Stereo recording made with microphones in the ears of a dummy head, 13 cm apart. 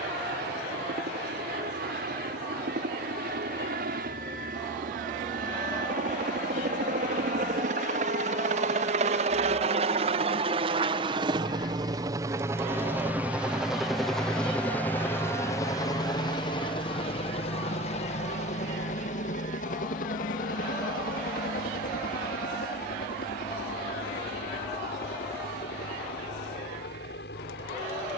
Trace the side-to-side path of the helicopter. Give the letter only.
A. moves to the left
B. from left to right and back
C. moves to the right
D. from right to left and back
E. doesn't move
A.